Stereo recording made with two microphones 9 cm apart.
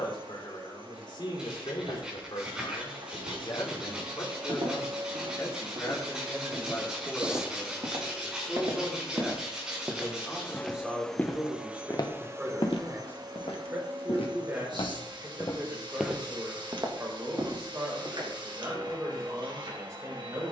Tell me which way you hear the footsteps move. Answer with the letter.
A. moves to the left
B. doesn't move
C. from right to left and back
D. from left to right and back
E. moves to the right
C.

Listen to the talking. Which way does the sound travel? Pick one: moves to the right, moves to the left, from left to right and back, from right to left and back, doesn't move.
moves to the right.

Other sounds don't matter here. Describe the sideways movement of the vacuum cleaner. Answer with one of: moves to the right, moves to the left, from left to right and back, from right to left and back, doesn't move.
from right to left and back.